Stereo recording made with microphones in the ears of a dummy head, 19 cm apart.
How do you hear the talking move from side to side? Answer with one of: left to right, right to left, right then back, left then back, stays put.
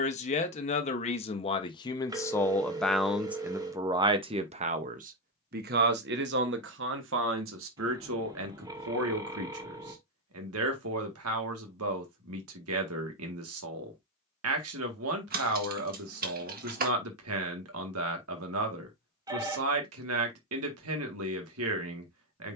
left to right.